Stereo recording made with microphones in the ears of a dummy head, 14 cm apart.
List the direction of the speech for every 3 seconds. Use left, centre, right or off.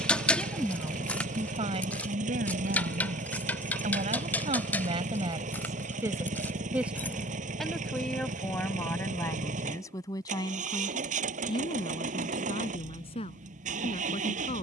right, right, centre, left, left.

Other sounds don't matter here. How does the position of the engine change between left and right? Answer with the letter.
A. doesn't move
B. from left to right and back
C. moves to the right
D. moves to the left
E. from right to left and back
A.